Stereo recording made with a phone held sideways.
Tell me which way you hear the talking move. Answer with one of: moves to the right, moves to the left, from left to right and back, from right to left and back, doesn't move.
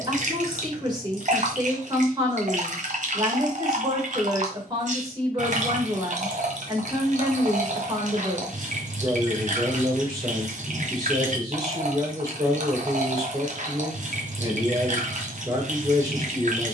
doesn't move.